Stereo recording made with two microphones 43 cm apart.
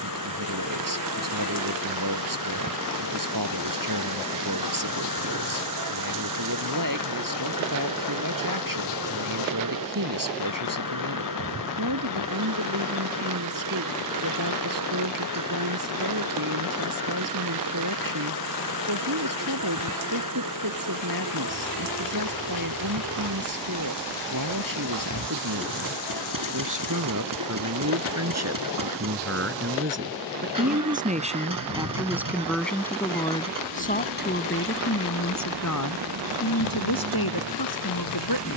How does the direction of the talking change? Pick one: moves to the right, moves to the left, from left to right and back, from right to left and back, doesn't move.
moves to the left.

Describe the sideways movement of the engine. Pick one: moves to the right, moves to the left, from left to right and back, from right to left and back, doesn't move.
doesn't move.